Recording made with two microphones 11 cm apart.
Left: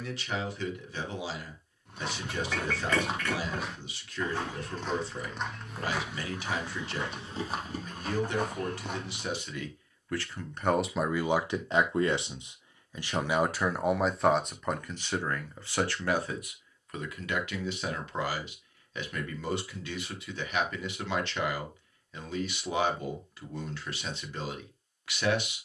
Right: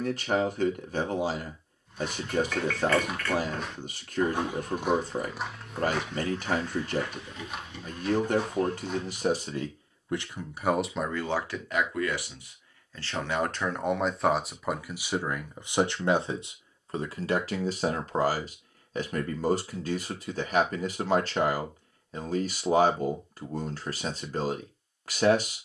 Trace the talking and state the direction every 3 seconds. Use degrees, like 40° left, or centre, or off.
50° right, 50° right, 50° right, 10° right, 10° left, 30° right, 40° right, 40° right, 40° right.